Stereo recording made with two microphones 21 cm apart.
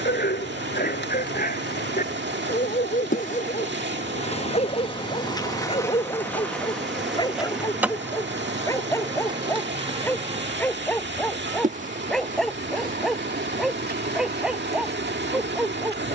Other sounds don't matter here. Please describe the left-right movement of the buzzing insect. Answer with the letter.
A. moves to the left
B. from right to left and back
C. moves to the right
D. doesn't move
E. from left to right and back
C.